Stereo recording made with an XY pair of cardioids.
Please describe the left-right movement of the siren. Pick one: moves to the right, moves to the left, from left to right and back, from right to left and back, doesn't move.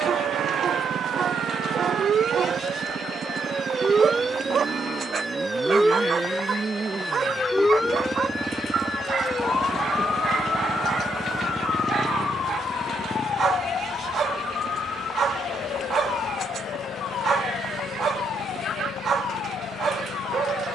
moves to the left.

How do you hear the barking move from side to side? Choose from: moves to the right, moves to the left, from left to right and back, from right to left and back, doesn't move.
doesn't move.